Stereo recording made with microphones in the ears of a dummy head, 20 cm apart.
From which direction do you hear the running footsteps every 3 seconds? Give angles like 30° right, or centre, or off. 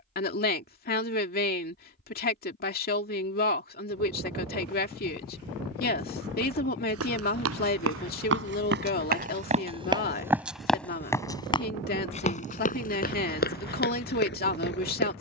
off, off, 60° right, 10° right, 40° left.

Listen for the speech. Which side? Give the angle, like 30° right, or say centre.
40° left.